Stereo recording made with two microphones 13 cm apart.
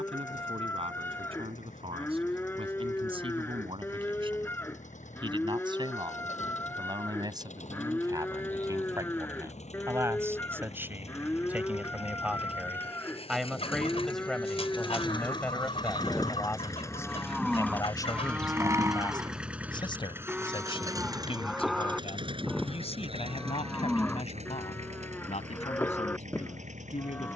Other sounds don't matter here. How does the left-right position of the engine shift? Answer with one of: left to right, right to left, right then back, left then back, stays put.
left to right.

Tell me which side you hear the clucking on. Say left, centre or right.
left.